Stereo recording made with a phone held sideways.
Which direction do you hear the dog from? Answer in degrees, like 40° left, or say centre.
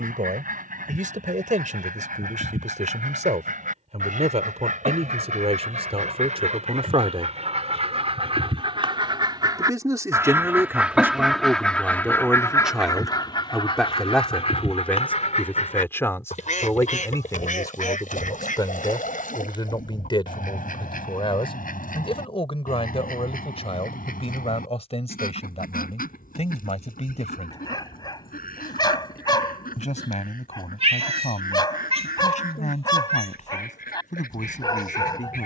30° left.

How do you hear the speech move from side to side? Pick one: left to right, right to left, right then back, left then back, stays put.
right to left.